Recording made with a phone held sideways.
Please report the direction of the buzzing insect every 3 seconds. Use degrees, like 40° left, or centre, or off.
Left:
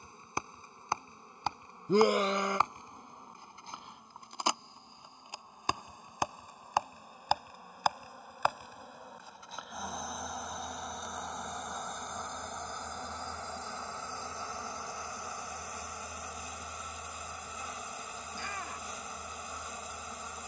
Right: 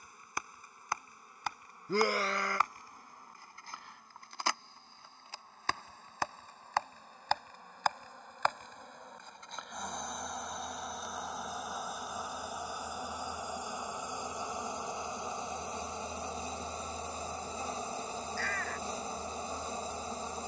20° left, 20° left, 10° left, centre, 10° right, 30° right, 30° right.